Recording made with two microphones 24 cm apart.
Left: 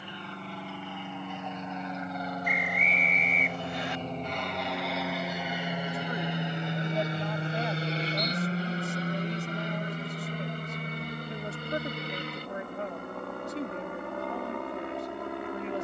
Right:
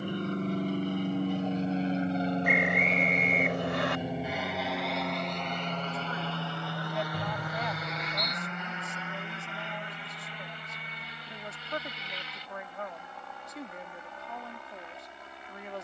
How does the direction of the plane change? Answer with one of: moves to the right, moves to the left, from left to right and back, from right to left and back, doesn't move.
moves to the left.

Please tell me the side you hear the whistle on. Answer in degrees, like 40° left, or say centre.
80° right.